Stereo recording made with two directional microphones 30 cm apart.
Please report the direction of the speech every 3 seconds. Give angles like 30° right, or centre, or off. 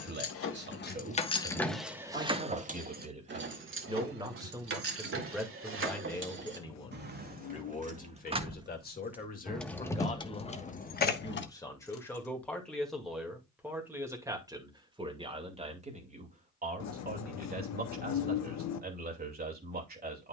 30° right, 10° right, 20° left, 20° left, centre, 30° right, 30° right.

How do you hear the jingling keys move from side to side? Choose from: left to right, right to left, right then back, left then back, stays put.
right then back.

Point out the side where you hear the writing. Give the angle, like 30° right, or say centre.
60° left.